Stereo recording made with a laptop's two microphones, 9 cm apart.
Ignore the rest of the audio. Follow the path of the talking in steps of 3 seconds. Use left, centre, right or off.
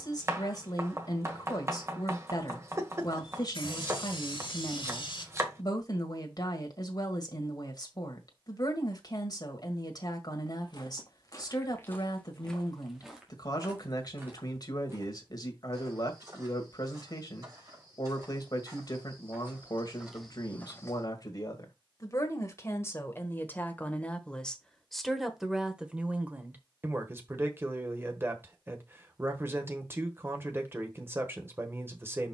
left, left, left, left, left, left, left, left, centre, right, right.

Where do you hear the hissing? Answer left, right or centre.
left.